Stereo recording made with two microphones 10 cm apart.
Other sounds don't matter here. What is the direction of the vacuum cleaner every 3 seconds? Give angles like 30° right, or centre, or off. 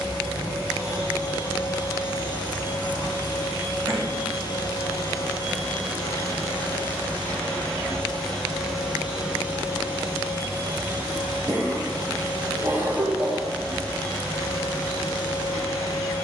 40° left, 40° left, 10° left, 20° right, centre, 30° left.